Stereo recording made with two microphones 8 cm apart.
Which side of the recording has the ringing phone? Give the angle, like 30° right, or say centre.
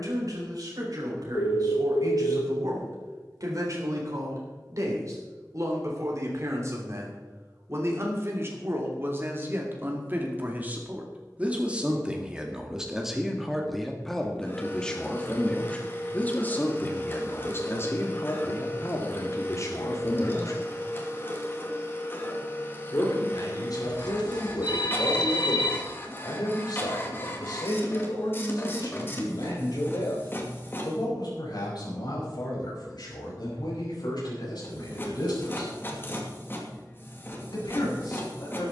80° left.